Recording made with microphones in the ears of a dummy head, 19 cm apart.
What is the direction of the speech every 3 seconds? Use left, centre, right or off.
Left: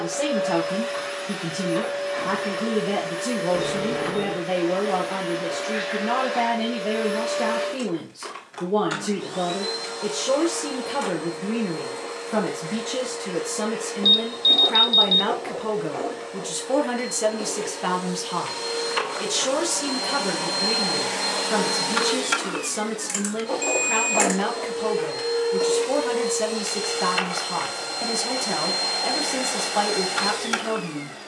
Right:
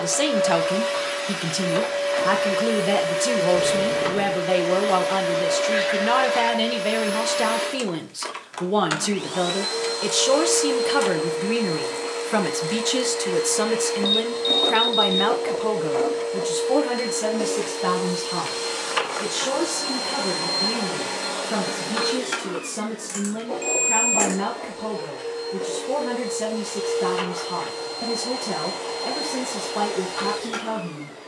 right, right, right, right, right, centre, left, left, left, left, left.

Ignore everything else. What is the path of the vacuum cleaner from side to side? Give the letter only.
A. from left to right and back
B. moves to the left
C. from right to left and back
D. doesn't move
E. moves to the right
B.